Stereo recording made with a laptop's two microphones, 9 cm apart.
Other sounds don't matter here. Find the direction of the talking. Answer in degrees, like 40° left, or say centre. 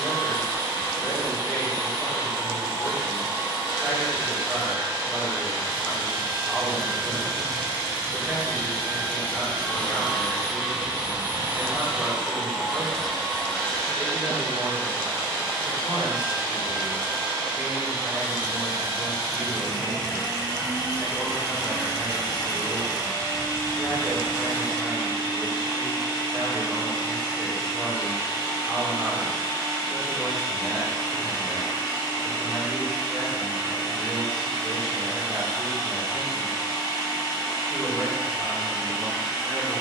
centre.